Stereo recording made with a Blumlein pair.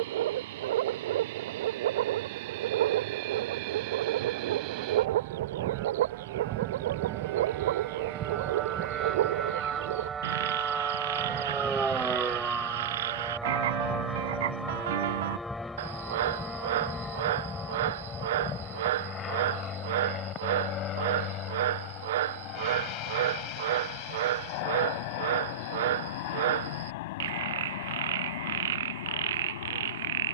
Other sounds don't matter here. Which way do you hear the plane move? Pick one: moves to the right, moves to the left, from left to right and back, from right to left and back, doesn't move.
moves to the left.